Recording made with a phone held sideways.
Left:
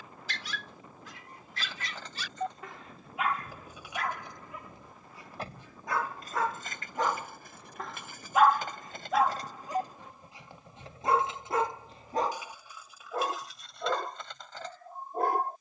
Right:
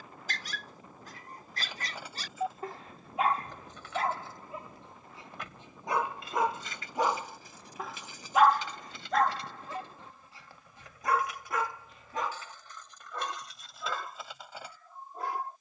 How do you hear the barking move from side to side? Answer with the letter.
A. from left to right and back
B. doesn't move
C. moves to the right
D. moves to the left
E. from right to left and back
D.